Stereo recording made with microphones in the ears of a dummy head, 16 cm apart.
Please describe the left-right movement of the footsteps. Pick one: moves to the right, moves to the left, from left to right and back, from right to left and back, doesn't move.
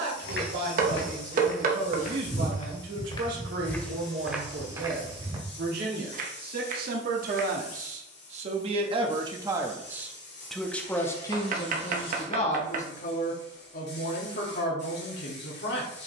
moves to the right.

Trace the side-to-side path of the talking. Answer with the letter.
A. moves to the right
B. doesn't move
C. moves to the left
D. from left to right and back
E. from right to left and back
C.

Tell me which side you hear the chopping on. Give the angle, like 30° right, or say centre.
50° right.